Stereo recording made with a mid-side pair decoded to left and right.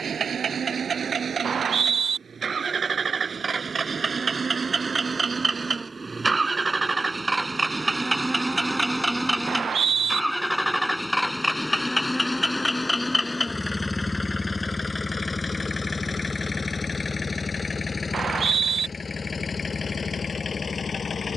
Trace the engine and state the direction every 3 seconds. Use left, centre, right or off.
right, right, right, centre, left, left, left.